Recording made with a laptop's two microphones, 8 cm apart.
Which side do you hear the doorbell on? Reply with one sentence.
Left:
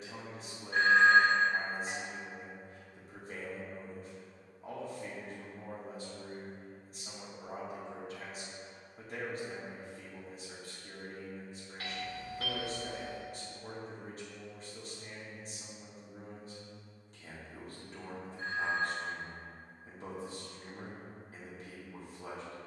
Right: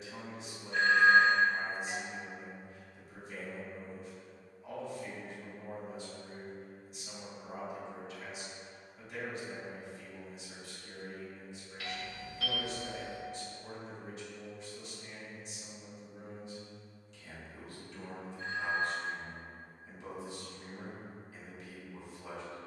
You can hear the doorbell on the left.